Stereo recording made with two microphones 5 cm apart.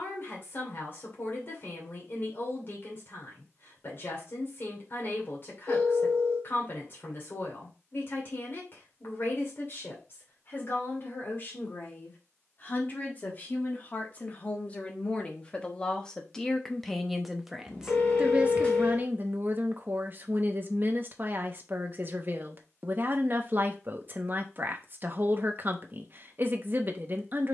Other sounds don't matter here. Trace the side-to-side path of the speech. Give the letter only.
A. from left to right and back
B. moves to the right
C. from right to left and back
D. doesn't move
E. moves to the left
B.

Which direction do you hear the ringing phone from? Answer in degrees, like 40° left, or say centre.
20° left.